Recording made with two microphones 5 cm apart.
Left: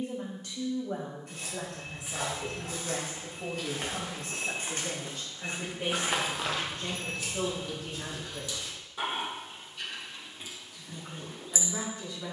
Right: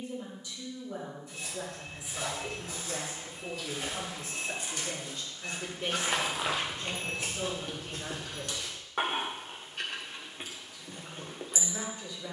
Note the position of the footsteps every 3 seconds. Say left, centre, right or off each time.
left, left, right, off.